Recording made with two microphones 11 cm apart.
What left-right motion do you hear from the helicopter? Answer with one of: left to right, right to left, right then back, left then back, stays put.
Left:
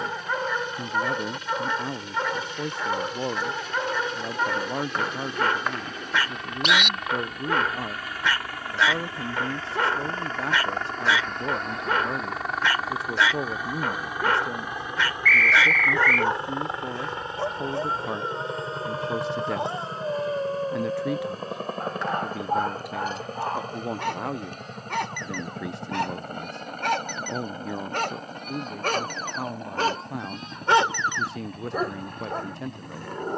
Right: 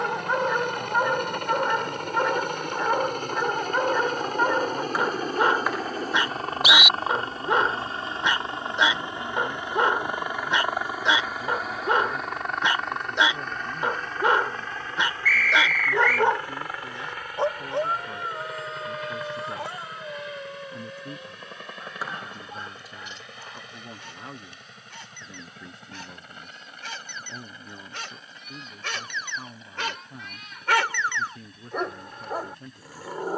right to left.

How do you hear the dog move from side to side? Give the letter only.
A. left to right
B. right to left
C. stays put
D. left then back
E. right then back
D.